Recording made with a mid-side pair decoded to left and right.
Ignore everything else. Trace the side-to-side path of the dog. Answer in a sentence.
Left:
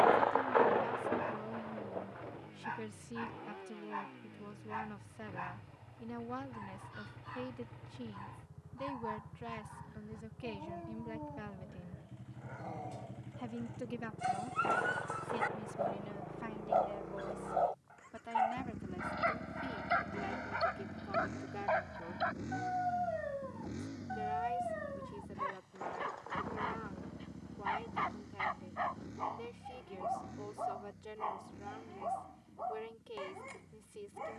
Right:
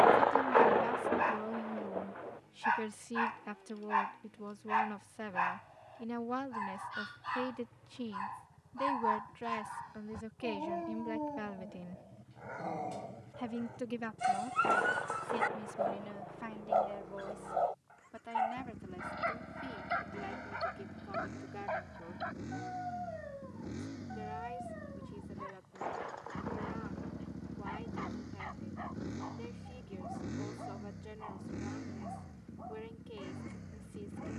In this clip you hear the dog move to the left.